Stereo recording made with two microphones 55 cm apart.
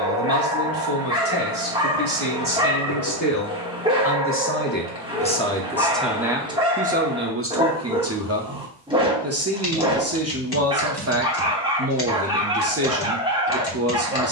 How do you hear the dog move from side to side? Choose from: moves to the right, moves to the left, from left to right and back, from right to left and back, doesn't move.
doesn't move.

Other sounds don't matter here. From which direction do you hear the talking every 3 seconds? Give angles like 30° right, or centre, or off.
40° left, 20° left, 20° right, 30° right, 30° right.